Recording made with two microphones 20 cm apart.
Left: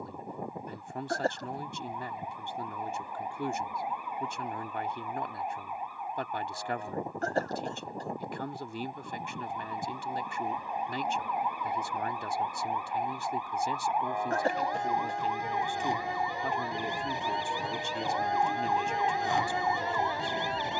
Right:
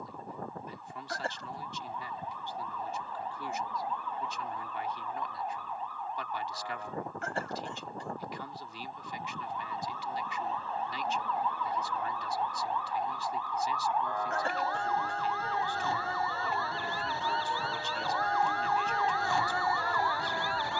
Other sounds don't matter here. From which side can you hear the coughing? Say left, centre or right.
left.